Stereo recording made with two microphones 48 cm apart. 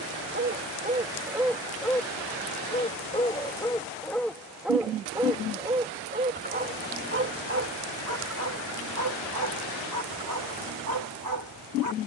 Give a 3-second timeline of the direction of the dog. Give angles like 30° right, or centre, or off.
10° right, centre, 30° right, 40° right.